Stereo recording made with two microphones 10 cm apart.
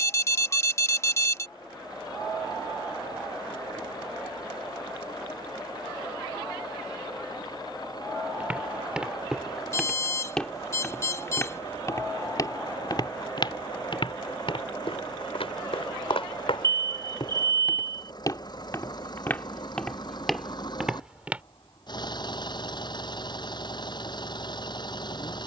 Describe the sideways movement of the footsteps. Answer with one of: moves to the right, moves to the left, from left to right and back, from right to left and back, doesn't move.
from right to left and back.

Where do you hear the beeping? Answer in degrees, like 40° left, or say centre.
30° left.